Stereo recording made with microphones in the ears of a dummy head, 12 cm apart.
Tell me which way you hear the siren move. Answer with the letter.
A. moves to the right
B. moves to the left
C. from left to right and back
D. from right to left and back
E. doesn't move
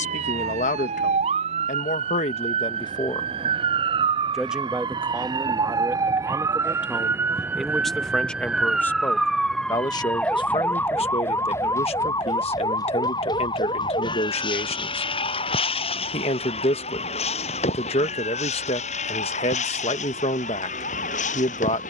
B.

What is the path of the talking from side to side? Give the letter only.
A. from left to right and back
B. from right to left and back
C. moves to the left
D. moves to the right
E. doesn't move
A.